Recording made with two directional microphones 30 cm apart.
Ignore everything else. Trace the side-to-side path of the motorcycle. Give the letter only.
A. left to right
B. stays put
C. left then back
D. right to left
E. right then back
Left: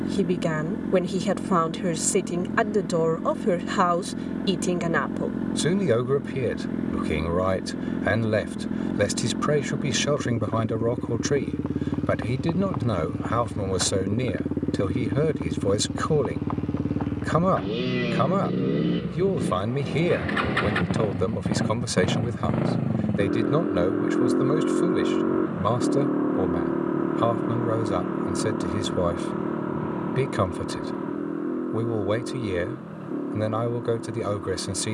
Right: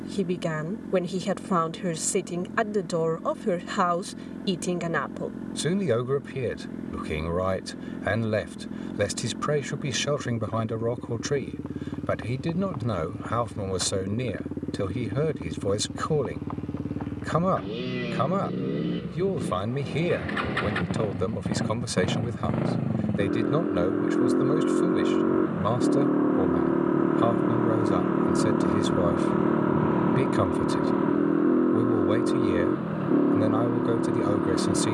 A.